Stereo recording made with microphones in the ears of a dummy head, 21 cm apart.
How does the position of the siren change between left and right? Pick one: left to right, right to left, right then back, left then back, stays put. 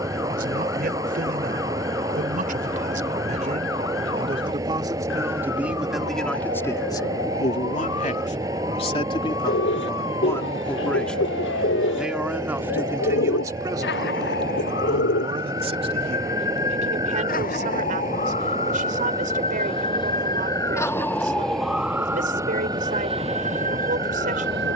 left to right.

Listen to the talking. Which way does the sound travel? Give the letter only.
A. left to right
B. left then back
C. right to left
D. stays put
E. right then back
B.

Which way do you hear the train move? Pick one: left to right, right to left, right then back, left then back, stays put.
stays put.